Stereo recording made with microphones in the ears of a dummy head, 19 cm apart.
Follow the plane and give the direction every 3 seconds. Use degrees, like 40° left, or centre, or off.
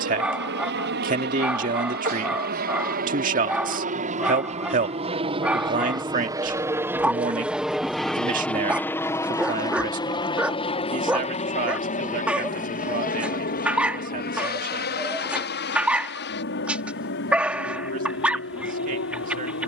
50° right, 30° right, centre, 20° left, 40° left, 50° left, 60° left.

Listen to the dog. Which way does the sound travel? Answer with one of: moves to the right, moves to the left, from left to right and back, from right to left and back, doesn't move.
doesn't move.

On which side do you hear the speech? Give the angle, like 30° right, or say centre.
40° right.